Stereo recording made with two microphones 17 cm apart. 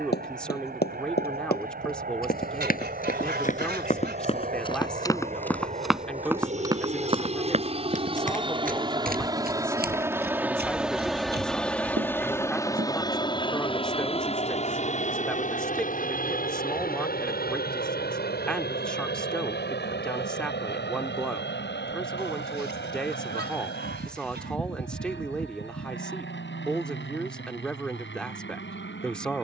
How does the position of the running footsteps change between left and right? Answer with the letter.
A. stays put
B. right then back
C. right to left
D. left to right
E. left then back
D.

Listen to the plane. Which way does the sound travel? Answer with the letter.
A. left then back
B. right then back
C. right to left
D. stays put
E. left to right
C.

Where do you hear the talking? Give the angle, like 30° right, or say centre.
centre.